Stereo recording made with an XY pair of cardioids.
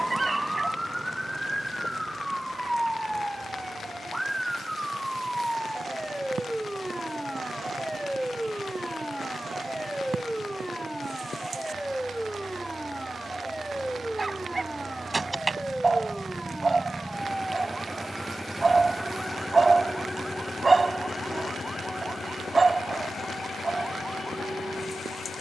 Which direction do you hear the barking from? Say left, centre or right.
right.